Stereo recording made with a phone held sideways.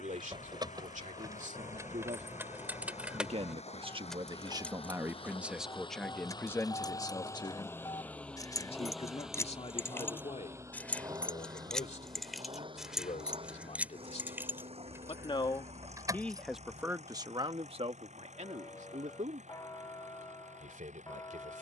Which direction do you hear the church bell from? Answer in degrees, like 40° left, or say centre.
30° left.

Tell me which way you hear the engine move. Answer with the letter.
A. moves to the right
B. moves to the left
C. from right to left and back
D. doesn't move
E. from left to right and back
A.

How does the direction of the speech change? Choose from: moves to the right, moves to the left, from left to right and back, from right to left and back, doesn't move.
from right to left and back.